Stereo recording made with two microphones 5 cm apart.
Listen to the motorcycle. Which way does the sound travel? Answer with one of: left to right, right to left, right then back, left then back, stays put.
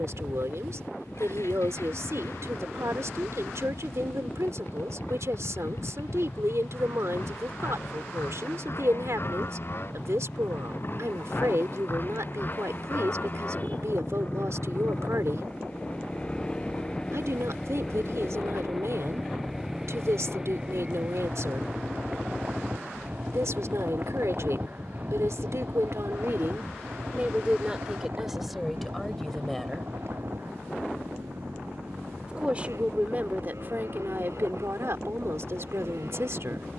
left to right.